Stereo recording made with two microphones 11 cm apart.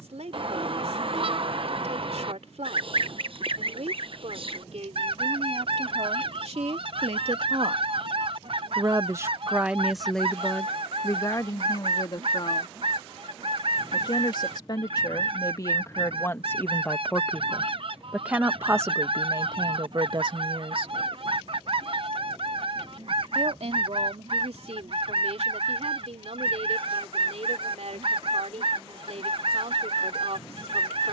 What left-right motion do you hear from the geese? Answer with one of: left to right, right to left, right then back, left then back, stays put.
stays put.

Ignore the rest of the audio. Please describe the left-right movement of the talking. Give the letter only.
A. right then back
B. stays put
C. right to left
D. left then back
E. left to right
D.